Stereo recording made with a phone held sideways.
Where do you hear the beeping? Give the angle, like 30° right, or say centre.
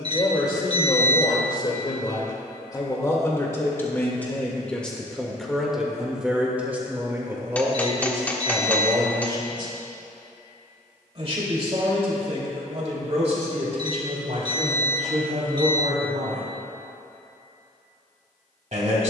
30° right.